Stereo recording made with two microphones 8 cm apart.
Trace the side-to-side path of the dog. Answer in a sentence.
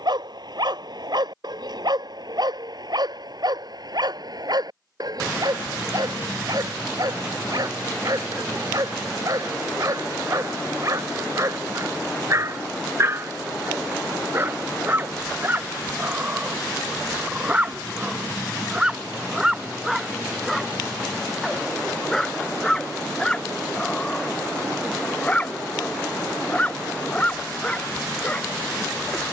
In this clip you hear the dog travel towards the left.